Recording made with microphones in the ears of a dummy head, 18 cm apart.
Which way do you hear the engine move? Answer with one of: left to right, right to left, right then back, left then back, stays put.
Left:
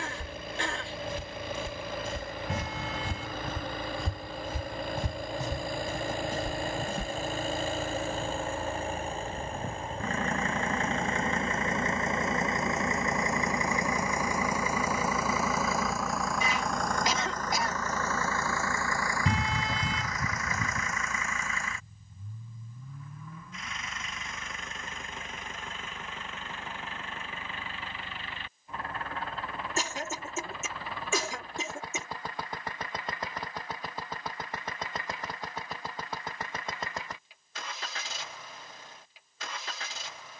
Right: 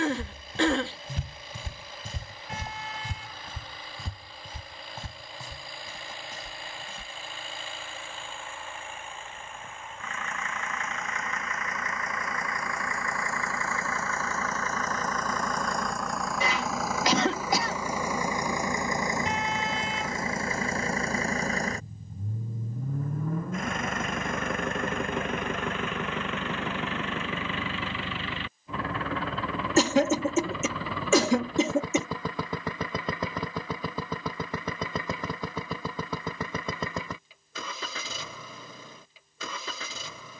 left to right.